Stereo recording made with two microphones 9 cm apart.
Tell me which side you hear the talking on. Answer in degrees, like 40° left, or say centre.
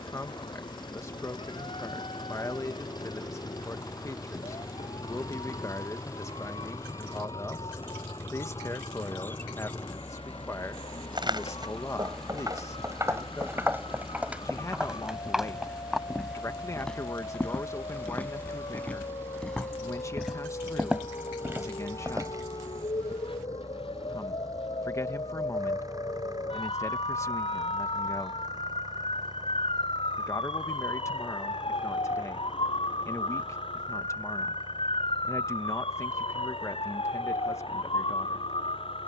30° left.